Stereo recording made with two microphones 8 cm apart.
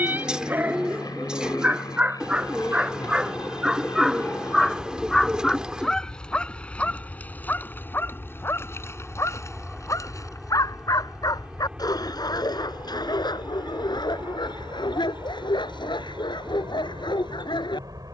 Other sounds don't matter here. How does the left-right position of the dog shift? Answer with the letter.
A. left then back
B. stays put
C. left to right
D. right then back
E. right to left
E.